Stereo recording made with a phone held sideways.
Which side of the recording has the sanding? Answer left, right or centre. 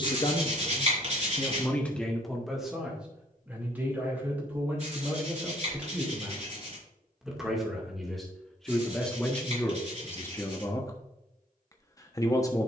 right.